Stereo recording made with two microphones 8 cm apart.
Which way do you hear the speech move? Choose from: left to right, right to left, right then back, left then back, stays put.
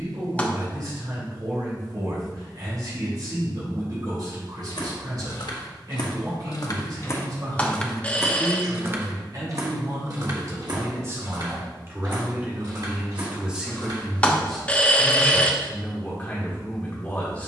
right to left.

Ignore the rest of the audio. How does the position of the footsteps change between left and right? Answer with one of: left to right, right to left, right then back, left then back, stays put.
left to right.